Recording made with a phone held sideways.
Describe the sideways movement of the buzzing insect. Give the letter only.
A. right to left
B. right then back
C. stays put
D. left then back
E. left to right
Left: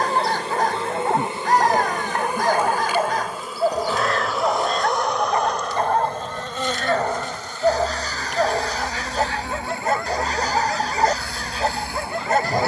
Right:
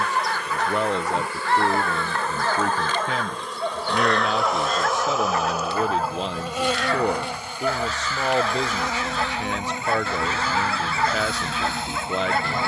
E.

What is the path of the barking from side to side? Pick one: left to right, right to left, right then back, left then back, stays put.
stays put.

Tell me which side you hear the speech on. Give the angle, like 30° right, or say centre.
80° right.